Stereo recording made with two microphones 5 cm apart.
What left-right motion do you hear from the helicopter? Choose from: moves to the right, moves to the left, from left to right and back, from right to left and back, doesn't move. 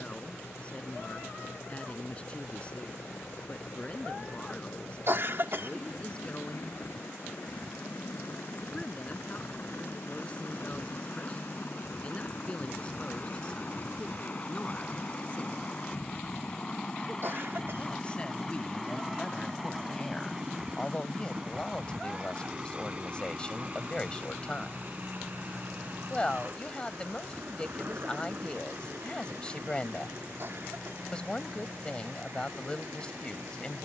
moves to the right.